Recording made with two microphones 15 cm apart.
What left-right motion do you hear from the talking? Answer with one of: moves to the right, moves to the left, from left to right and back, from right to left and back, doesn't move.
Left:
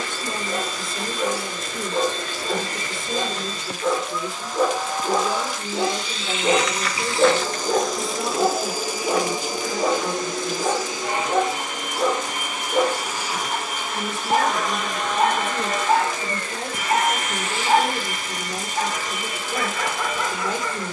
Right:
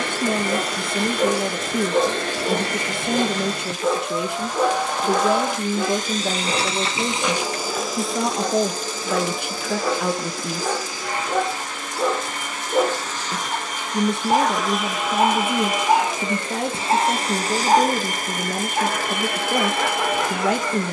doesn't move.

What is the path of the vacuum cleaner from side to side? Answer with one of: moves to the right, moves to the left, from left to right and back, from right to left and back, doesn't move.
from right to left and back.